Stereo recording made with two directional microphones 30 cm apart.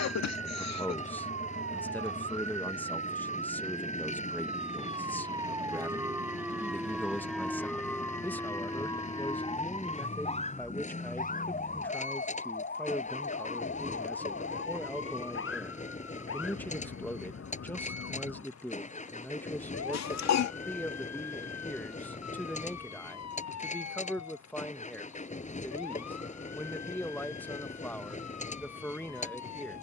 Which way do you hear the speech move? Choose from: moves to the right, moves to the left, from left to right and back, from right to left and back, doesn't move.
doesn't move.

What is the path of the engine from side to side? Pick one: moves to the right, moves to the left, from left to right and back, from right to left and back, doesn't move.
doesn't move.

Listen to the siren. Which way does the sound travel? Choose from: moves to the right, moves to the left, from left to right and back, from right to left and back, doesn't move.
moves to the left.